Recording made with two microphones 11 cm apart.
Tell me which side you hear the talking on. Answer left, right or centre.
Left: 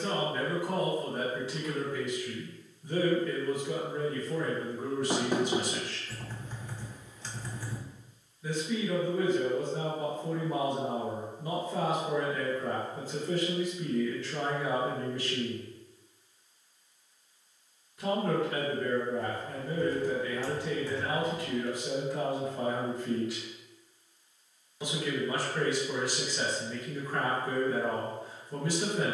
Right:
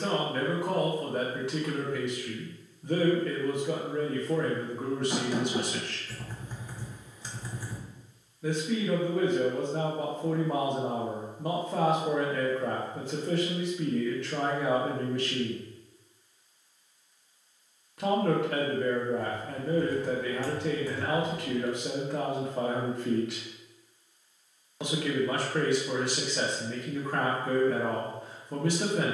right.